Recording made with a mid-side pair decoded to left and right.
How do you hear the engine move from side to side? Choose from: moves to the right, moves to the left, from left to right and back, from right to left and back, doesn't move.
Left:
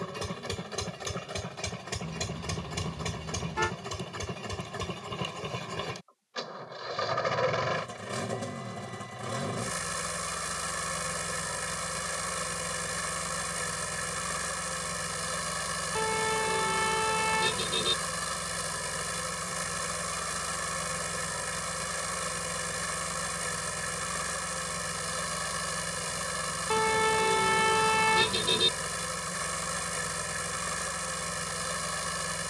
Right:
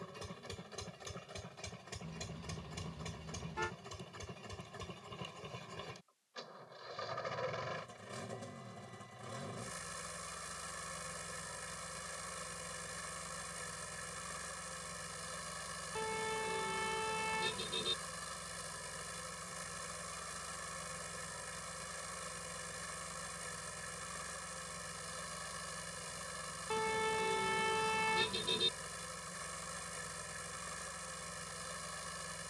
doesn't move.